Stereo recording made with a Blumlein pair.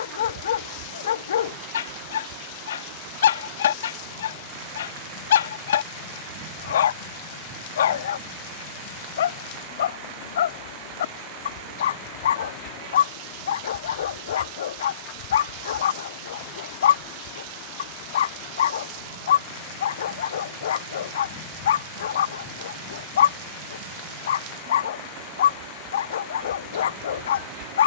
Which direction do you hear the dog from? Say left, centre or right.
left.